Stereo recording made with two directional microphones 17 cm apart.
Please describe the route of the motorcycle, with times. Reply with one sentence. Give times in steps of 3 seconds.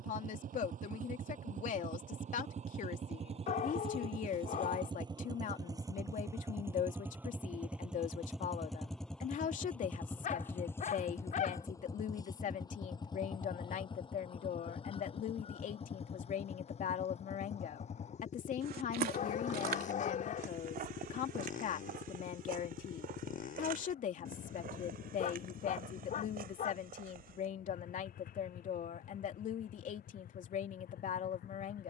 In this clip you hear the motorcycle on the right from 0 s, in the centre from 6 s and on the left from 12 s.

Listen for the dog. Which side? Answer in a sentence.
You can hear the dog on the left.